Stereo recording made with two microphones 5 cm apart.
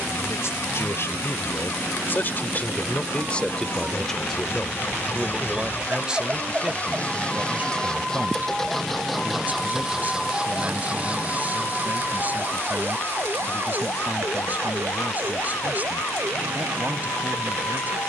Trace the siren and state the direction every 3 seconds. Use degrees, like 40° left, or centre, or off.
50° right, 30° right, 10° right, 20° left, 50° left, 60° left.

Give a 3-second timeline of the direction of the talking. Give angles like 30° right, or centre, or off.
50° left, 10° left, 30° right, 30° right, 30° right, 30° right.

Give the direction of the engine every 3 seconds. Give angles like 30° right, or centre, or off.
60° left, 50° left, 20° left, 20° right, 50° right, 60° right.